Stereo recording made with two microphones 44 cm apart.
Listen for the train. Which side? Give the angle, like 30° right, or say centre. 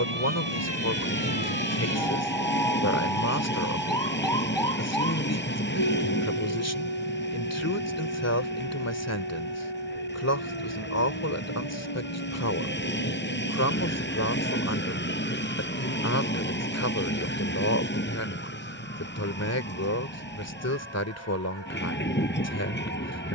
20° left.